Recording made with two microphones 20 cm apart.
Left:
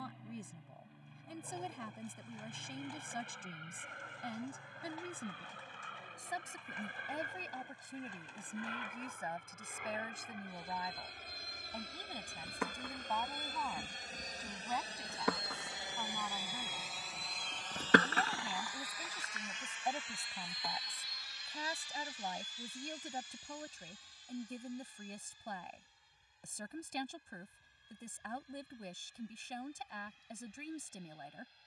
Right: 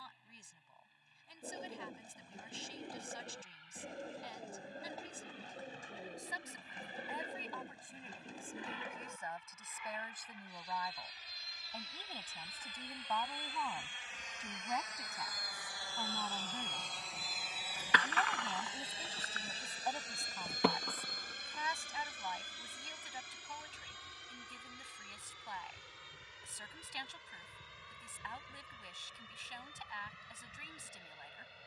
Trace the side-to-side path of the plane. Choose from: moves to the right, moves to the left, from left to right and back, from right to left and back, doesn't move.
moves to the right.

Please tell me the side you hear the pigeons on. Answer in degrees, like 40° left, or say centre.
40° right.